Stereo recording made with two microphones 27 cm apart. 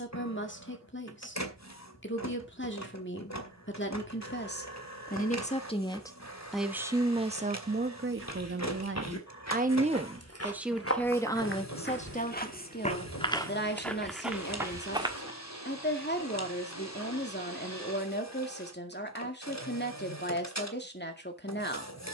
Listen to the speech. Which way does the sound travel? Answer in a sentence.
In this clip you hear the speech go right and come back.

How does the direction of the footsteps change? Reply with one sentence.
In this clip you hear the footsteps move to the right.